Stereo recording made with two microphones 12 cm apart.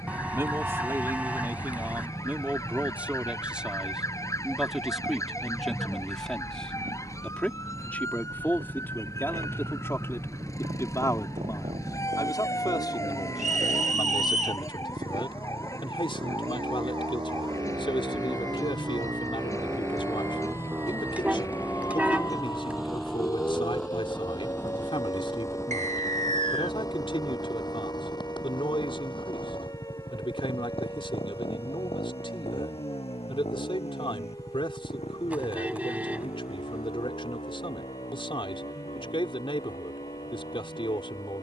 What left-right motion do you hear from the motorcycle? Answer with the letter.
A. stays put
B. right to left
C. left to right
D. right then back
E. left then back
B.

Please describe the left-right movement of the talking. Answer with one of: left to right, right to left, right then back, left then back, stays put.
right to left.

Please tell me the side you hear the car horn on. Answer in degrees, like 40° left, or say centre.
10° right.